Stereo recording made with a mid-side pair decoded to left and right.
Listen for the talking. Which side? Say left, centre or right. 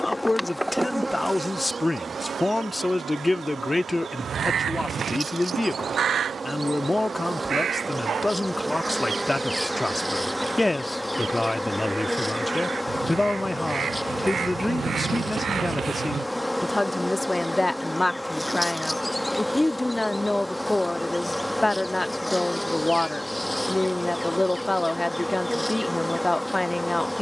left.